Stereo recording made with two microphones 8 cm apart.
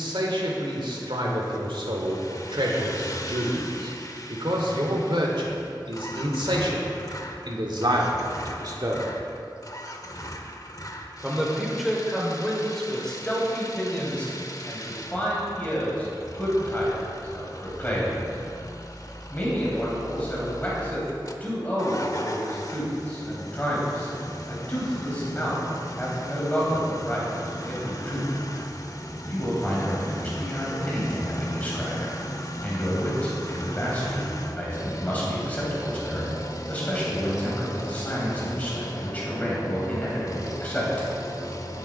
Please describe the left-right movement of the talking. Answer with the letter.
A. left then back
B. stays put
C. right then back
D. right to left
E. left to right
D.